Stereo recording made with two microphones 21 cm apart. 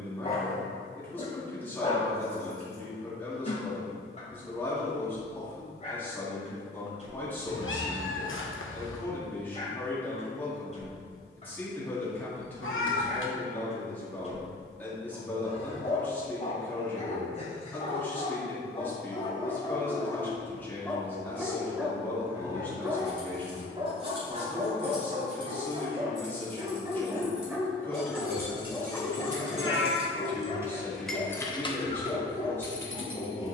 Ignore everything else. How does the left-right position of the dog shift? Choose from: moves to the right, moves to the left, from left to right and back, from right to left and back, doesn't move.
from left to right and back.